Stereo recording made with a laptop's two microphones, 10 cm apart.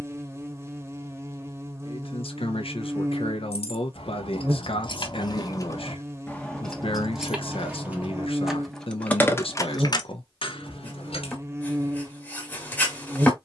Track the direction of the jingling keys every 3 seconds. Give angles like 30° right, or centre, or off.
off, 60° left, centre, 50° left, off.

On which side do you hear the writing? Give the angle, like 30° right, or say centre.
20° left.